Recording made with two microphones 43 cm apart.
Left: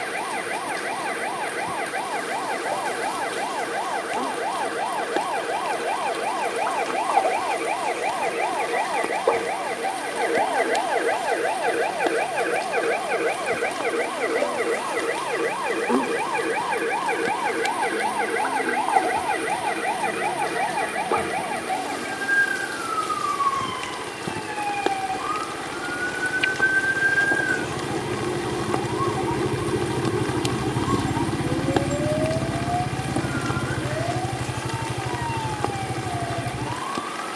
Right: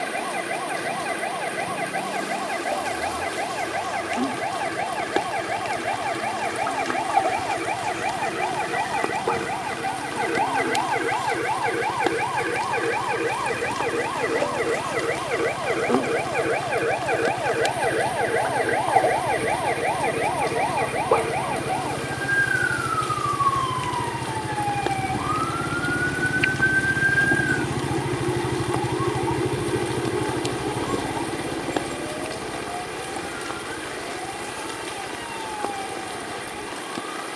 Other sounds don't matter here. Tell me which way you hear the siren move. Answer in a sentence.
You can hear the siren go from the right side to the left.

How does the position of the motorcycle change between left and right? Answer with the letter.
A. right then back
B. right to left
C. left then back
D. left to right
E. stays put
B.